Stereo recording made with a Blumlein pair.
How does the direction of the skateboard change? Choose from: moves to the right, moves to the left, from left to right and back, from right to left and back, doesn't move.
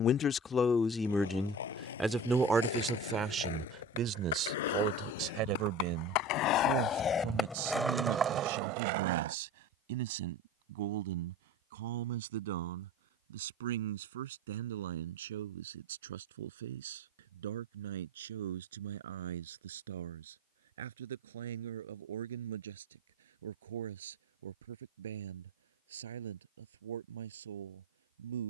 moves to the right.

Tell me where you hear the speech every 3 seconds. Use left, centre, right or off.
centre, right, right, right, right, right, right, right, right, right.